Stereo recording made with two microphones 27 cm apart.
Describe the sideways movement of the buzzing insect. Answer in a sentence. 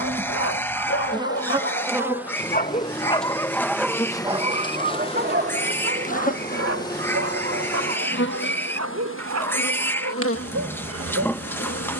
In this clip you hear the buzzing insect move to the left.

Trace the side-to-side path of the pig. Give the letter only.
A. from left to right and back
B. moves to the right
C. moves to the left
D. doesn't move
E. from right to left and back
D.